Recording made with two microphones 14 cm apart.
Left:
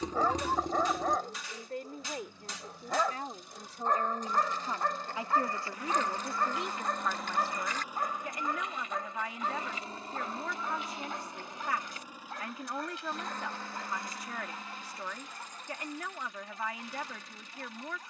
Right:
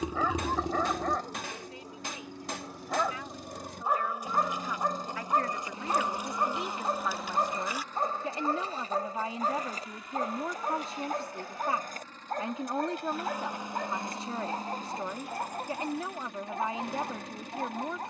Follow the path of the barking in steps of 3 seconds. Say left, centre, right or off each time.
centre, centre, right, right, right, right.